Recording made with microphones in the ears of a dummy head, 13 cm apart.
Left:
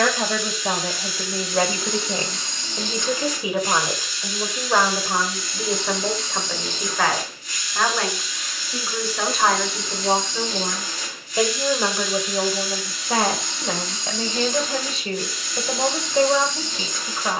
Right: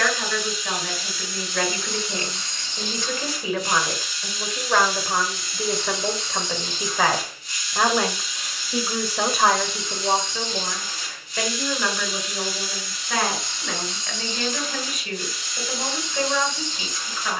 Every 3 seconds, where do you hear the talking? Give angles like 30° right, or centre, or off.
30° left, 10° left, 10° right, centre, 30° left, 30° left.